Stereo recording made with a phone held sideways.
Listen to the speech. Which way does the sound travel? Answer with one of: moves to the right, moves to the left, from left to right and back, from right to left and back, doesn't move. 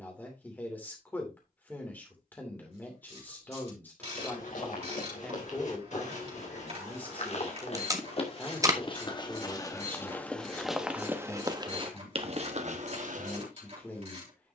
doesn't move.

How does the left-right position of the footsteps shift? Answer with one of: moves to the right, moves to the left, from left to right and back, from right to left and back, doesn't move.
moves to the right.